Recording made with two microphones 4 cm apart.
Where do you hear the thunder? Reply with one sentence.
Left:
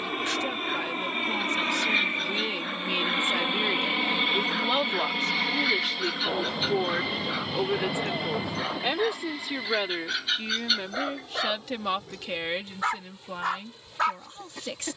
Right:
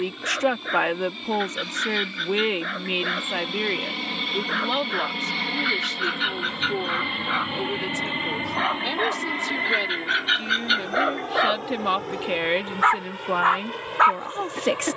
In this clip you hear the thunder on the left.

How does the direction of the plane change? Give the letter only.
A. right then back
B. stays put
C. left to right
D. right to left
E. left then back
C.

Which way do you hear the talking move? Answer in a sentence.
You can hear the talking move from right to left and back again.